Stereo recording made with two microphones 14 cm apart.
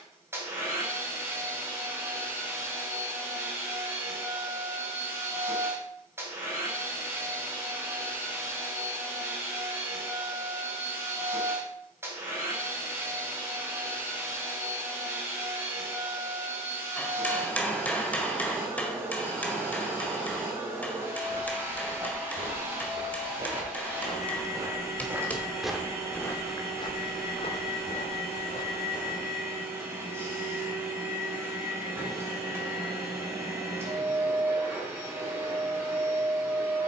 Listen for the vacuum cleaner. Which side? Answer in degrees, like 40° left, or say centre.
20° right.